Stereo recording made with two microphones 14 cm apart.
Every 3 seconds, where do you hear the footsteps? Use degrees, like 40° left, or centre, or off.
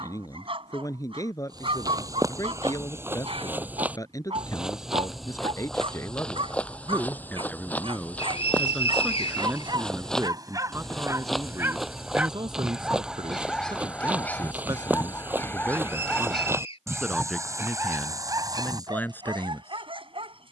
20° right, 10° right, 10° left, centre, 10° right, 20° right, 30° right.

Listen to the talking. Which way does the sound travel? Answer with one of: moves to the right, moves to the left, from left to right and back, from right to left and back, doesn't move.
from left to right and back.